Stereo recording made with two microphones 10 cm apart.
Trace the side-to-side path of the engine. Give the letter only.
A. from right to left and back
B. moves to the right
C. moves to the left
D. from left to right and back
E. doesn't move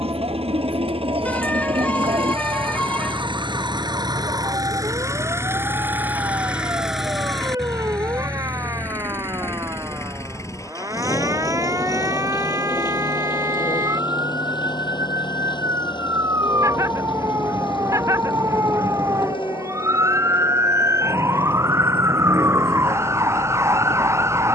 C.